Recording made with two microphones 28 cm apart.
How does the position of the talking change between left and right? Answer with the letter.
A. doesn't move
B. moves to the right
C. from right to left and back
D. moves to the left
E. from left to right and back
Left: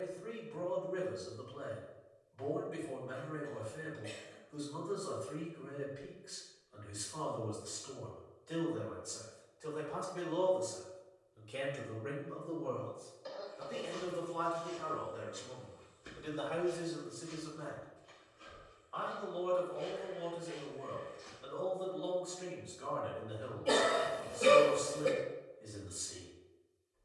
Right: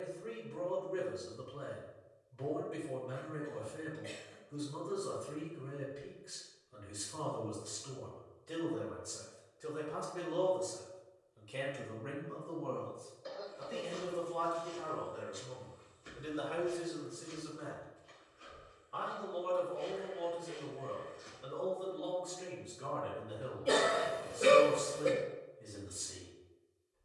C.